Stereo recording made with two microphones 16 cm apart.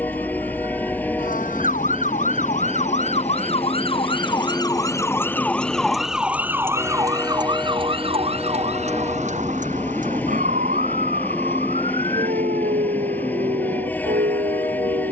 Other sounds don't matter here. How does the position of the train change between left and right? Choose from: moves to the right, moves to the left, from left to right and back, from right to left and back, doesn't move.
doesn't move.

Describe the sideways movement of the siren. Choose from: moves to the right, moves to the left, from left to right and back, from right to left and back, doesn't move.
moves to the right.